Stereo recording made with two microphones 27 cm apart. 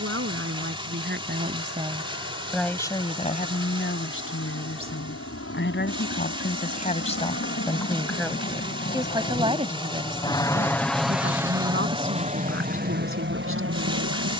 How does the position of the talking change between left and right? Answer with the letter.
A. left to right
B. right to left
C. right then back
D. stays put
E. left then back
E.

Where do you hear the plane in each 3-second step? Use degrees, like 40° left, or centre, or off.
70° left, 70° left, 50° left, 10° left, 40° right.